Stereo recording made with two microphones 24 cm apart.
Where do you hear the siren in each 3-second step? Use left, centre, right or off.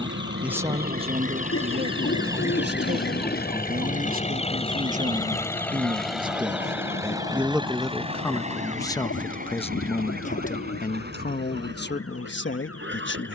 right, left, left, left, left.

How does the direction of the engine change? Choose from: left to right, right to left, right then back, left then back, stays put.
left to right.